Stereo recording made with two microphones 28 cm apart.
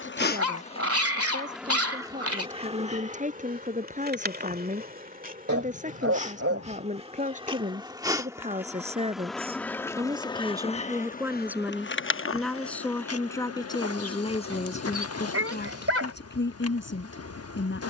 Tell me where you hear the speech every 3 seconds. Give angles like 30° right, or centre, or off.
30° right, 30° right, 30° right, 10° right, 10° left, 40° left.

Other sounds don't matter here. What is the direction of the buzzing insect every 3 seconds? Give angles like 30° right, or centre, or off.
centre, 30° right, 20° right, 20° left, 60° left, 60° left.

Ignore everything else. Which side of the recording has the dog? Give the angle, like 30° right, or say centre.
60° right.